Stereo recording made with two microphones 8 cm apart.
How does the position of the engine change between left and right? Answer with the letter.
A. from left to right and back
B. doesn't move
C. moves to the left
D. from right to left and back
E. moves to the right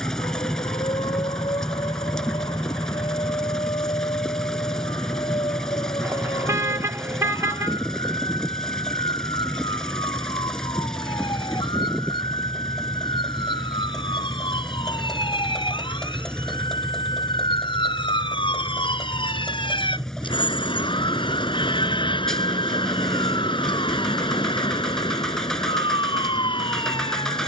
B.